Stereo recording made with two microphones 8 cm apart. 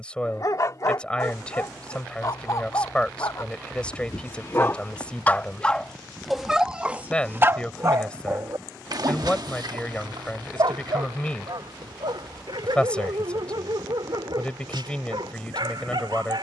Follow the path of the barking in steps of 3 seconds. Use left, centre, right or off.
left, left, right, right, right, right.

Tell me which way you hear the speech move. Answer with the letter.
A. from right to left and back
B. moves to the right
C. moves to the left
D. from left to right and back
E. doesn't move
E.